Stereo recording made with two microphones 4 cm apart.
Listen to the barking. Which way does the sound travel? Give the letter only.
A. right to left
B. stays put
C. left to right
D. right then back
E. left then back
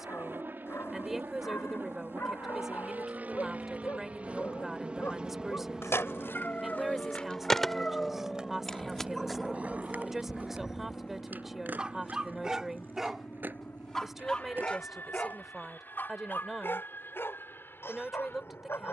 D.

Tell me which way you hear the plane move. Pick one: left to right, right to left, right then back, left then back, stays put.
right to left.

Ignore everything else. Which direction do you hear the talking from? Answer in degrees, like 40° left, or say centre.
10° right.